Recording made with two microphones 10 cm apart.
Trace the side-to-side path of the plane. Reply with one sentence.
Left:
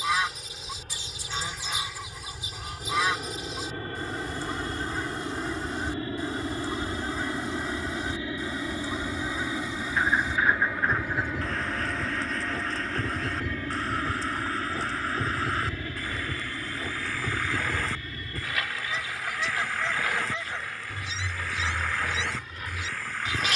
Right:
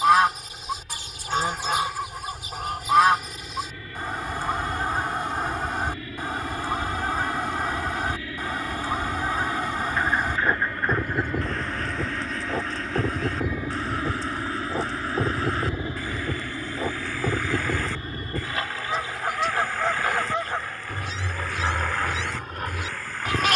You can hear the plane move to the right.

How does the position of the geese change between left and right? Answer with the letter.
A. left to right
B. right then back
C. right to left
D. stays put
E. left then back
D.